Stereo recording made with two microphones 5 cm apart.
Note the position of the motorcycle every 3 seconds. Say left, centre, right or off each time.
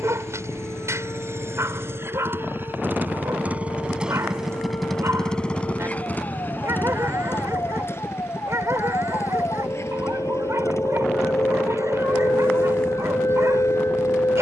right, centre, left, left, left.